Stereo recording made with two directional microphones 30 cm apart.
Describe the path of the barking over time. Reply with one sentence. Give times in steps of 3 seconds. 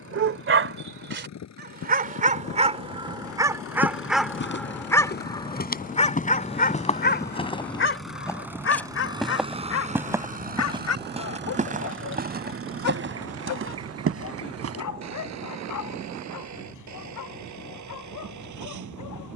You can hear the barking on the right from 0 s, in the centre from 3 s and on the left from 6 s.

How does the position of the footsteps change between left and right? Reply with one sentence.
You can hear the footsteps move to the right.